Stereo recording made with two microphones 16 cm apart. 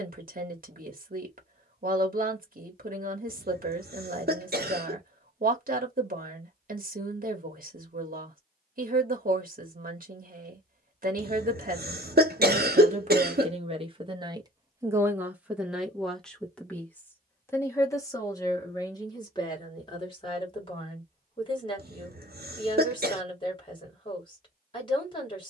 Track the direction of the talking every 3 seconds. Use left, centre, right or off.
right, right, right, right, right, centre, left, left, left.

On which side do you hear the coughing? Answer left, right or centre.
right.